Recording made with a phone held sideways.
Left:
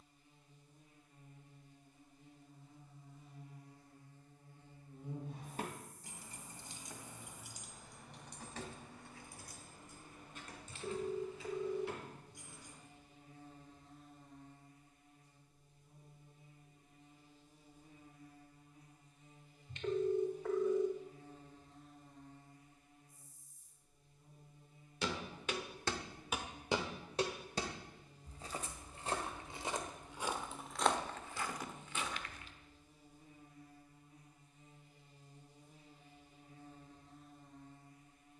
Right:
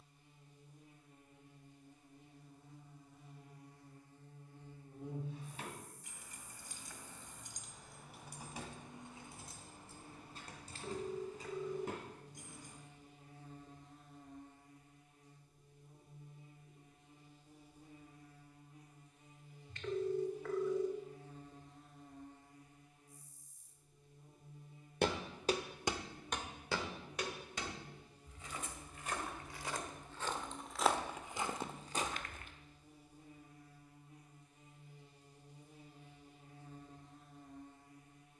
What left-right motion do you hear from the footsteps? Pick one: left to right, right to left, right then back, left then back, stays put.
left then back.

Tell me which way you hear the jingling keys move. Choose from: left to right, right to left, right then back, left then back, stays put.
left to right.